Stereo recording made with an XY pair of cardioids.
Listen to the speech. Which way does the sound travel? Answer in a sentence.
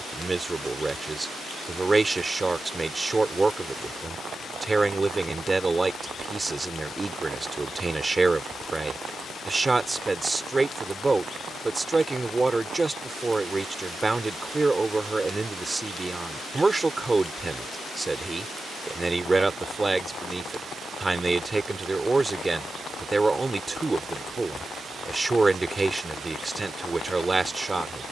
You can hear the speech stay in one place.